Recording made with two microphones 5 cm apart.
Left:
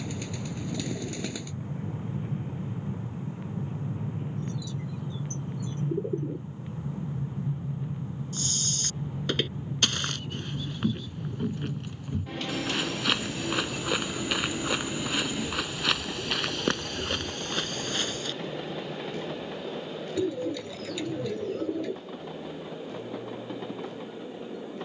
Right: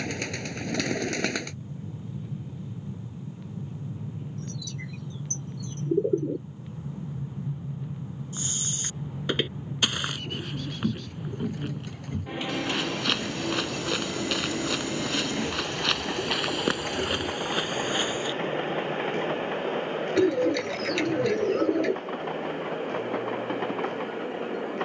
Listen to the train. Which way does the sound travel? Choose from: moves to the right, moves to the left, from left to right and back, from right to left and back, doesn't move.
moves to the right.